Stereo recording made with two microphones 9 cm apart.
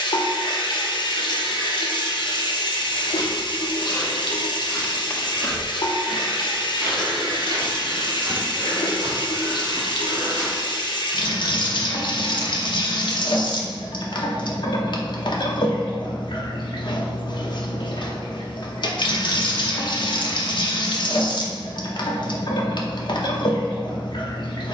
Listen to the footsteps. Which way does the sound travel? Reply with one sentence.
You can hear the footsteps go from the left side to the right.